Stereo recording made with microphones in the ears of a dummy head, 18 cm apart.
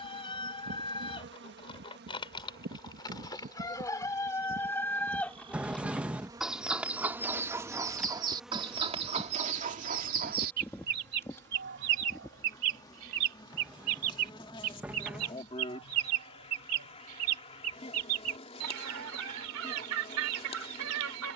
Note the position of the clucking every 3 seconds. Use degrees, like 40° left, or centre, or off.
20° left, 10° left, 10° right, 40° right, 70° right, 80° right, 80° right.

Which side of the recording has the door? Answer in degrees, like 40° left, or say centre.
10° right.